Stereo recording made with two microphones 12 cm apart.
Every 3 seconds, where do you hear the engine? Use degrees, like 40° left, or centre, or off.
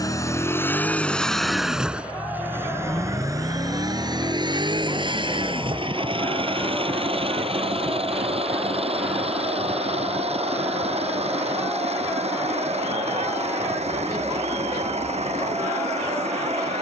centre, 40° right, 50° right, 60° right, 60° right, 70° right.